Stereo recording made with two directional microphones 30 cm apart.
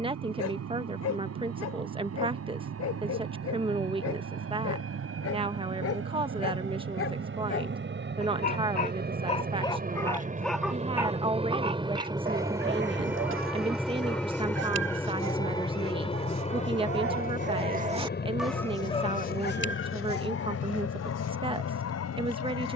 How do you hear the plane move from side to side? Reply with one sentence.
You can hear the plane go from the right side to the left.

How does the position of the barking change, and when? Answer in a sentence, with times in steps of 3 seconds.
In this clip you hear the barking on the left from 0 s, in the centre from 9 s, on the right from 12 s and on the left from 18 s.